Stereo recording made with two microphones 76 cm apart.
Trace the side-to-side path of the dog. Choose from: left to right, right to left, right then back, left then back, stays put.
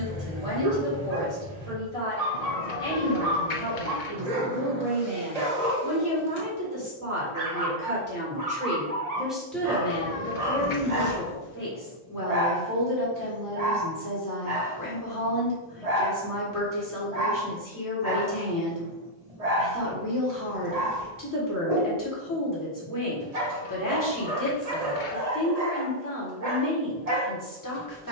stays put.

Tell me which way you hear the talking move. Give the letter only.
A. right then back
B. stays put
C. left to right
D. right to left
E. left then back
D.